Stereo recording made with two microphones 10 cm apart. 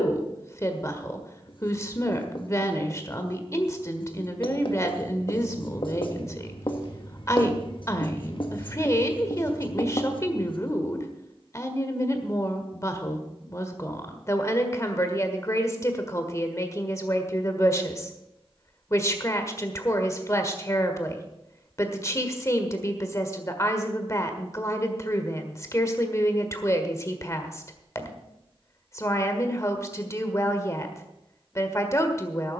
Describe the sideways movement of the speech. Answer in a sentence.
You can hear the speech stay in one place.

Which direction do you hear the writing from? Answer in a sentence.
You can hear the writing on the left.